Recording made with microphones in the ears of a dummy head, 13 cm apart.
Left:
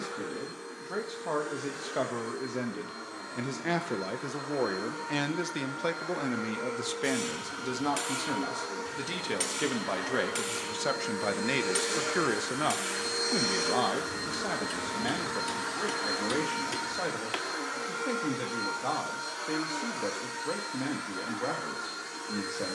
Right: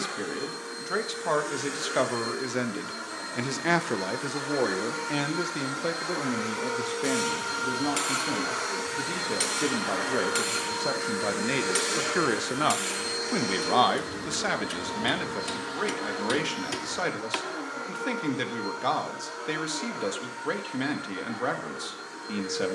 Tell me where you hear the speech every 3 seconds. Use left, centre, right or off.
right, centre, left, left, right, right, right, right.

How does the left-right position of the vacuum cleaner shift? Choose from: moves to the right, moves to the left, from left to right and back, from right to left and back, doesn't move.
moves to the left.